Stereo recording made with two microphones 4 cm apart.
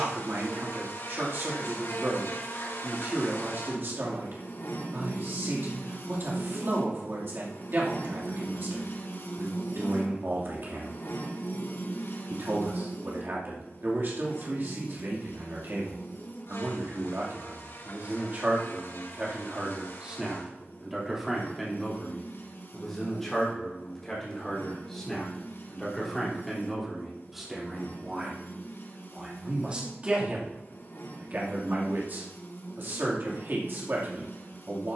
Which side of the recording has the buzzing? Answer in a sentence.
You can hear the buzzing on the left.